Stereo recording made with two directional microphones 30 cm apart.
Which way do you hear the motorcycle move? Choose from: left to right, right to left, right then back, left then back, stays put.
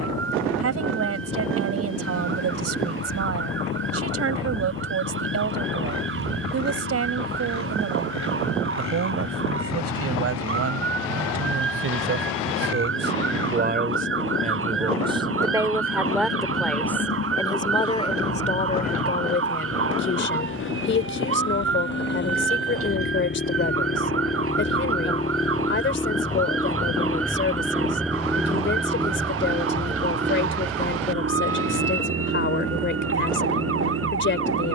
left to right.